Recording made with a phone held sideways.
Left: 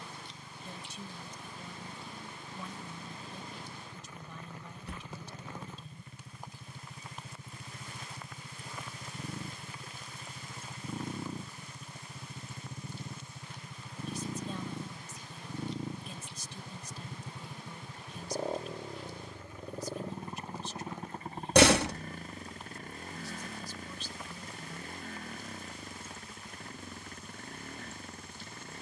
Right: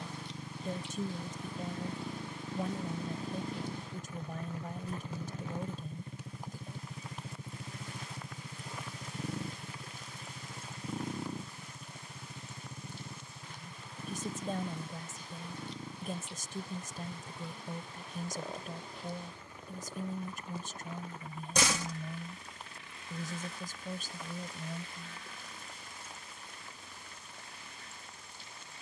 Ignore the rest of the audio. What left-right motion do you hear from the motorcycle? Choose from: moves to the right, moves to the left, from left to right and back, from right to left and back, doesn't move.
moves to the left.